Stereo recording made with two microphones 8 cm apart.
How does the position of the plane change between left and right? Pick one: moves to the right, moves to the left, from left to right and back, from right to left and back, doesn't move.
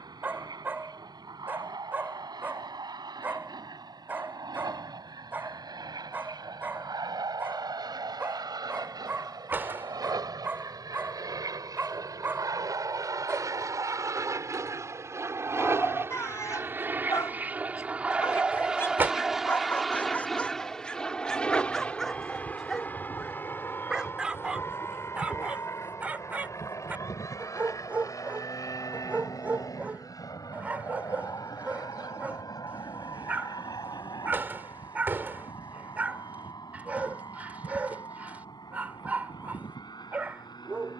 moves to the left.